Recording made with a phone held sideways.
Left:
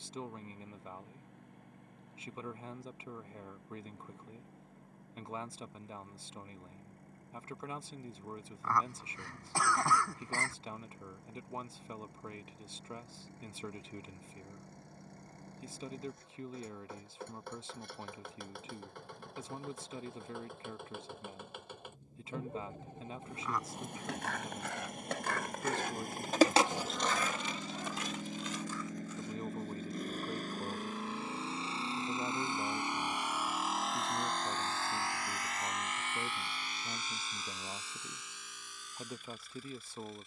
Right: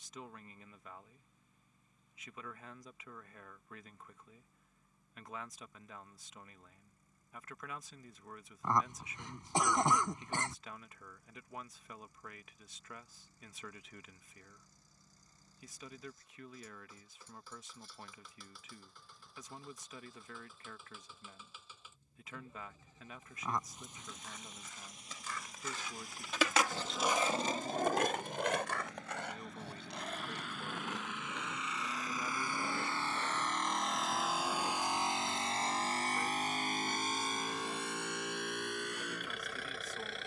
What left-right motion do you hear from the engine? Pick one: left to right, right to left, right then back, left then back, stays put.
left to right.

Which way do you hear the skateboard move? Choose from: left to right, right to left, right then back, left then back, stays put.
left to right.